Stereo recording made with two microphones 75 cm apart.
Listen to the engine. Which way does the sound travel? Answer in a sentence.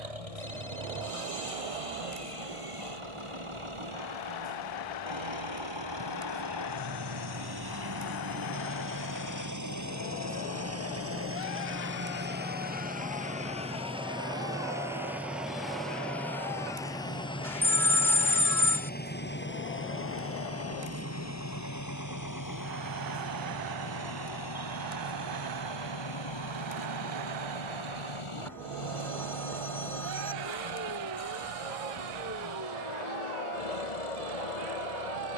You can hear the engine travel towards the left.